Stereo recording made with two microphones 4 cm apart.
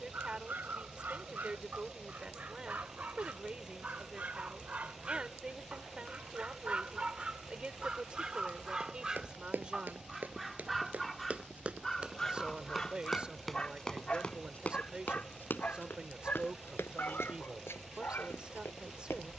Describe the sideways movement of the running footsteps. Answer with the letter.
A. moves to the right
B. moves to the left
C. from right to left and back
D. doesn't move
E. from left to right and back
B.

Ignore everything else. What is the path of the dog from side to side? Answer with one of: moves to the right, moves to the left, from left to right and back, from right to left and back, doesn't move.
moves to the left.